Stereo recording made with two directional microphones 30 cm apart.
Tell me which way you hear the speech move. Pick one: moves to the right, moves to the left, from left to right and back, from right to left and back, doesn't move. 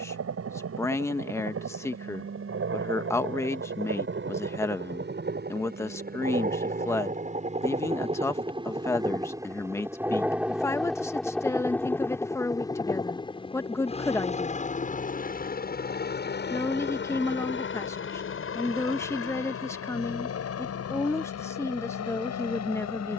doesn't move.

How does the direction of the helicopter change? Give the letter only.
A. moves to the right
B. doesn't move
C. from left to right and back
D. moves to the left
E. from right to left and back
D.